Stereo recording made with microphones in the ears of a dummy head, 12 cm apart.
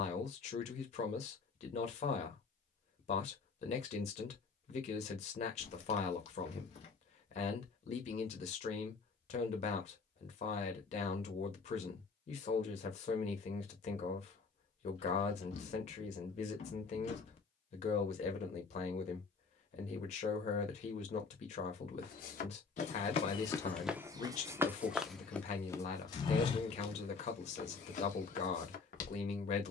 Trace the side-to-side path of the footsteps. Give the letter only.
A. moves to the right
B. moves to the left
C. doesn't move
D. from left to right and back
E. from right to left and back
D.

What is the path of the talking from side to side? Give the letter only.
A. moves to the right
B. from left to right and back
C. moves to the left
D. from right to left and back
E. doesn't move
E.